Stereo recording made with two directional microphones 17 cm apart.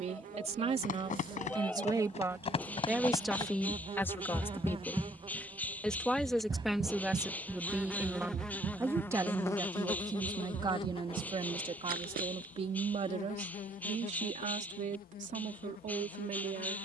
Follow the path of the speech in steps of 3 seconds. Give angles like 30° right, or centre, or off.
30° right, 10° left, centre, 20° right, 40° right, 50° right.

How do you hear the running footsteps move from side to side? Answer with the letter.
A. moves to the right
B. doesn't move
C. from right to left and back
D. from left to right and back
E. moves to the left
A.